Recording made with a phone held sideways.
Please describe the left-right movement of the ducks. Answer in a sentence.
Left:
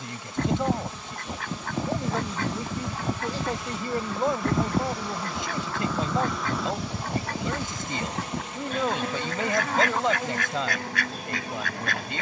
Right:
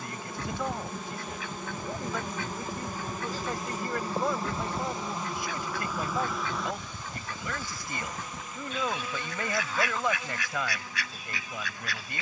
You can hear the ducks stay put.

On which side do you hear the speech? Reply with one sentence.
You can hear the speech on the left.